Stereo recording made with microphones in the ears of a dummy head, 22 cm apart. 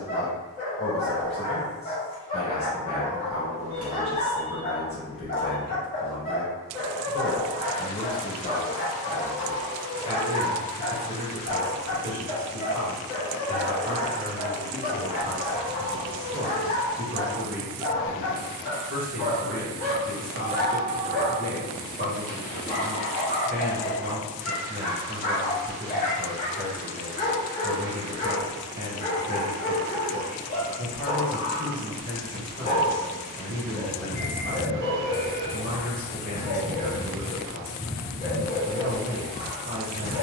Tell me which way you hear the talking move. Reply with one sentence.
In this clip you hear the talking move to the right.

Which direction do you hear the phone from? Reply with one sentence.
You can hear the phone on the right.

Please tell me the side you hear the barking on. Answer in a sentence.
In this clip you hear the barking on the left.